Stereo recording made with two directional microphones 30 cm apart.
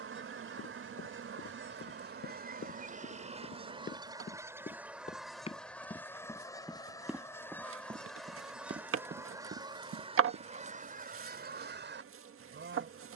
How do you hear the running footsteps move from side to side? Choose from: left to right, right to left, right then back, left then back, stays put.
left to right.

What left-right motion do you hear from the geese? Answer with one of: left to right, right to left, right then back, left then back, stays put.
left then back.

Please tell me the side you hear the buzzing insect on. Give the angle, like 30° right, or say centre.
40° right.